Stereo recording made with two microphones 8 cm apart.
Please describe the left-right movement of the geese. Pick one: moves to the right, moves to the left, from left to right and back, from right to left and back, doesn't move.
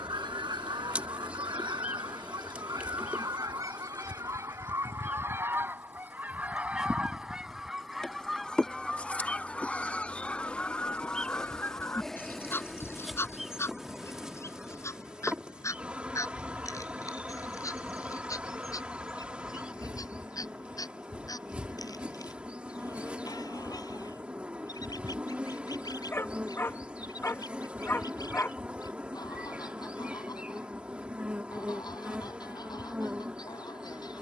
moves to the left.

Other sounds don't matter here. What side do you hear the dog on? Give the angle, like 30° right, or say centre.
30° left.